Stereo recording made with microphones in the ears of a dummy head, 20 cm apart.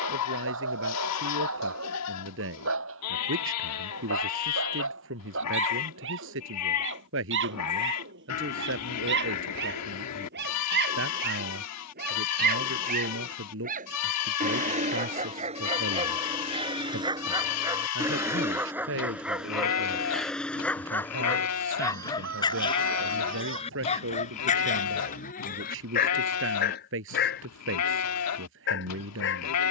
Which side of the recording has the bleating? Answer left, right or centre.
left.